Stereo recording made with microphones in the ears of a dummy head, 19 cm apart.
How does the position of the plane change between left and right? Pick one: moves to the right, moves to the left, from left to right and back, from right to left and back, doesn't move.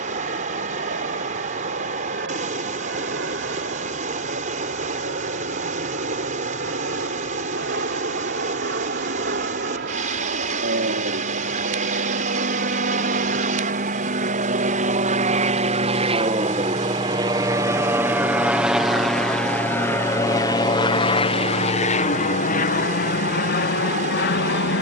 moves to the left.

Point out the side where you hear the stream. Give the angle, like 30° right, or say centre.
40° right.